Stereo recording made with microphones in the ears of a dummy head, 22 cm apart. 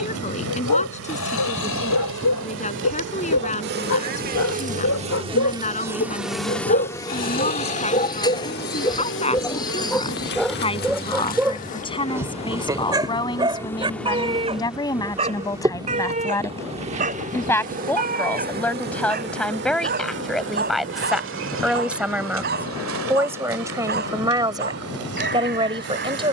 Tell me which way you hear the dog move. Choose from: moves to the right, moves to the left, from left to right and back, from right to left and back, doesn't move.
moves to the right.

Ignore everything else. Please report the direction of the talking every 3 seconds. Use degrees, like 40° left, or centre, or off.
30° left, 30° left, 30° left, 20° left, 20° left, 10° left, centre, 10° right, 20° right.